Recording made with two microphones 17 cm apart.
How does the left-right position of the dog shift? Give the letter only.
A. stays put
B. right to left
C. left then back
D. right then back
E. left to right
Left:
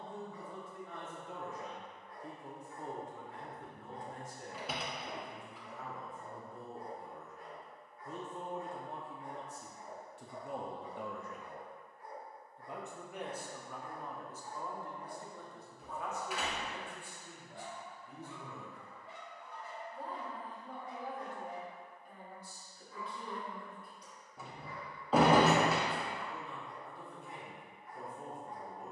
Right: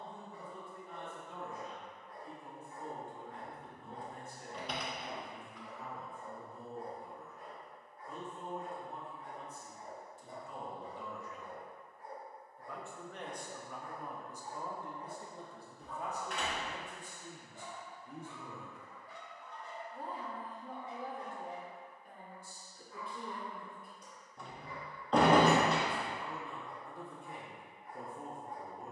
C.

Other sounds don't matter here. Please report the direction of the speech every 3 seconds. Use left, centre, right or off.
left, left, left, left, centre, right, right, right, right, right.